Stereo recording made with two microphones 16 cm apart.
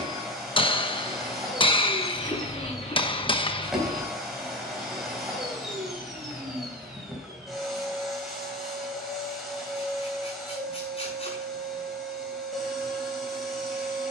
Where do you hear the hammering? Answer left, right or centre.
left.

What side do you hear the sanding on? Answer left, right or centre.
left.